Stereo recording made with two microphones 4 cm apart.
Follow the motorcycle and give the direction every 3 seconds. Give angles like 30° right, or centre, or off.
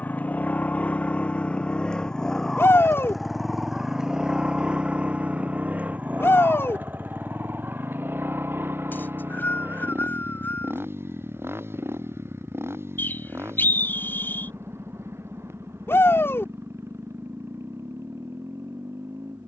30° left, 20° right, 50° right, 60° right, 70° right, 70° right, 70° right.